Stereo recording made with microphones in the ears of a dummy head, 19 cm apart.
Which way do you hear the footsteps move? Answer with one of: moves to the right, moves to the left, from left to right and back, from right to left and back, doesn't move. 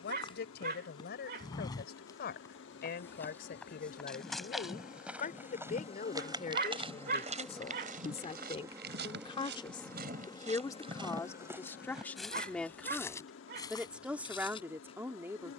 from left to right and back.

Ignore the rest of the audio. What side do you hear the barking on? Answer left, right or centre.
right.